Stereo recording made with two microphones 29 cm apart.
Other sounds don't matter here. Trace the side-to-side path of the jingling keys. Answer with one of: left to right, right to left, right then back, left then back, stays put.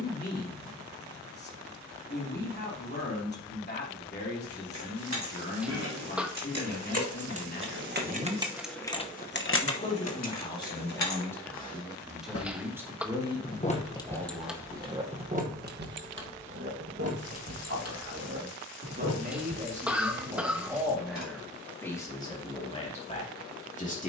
left then back.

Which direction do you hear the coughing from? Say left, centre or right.
centre.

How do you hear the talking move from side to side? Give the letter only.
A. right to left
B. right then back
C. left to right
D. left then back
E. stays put
B.